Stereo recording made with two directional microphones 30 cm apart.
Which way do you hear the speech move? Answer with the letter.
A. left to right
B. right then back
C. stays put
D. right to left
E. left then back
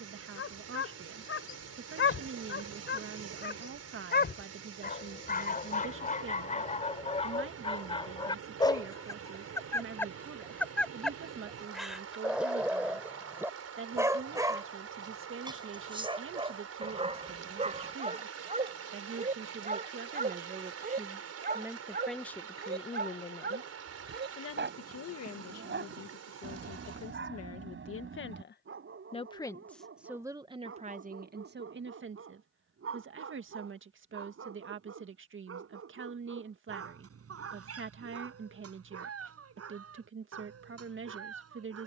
E.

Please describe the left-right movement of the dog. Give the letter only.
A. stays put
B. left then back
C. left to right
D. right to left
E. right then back
C.